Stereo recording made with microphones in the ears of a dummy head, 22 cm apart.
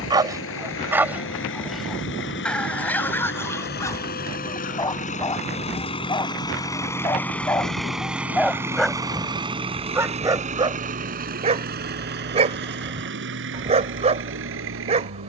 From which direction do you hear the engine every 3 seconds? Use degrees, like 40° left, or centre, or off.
50° left, 40° left, centre, 30° right, 50° right.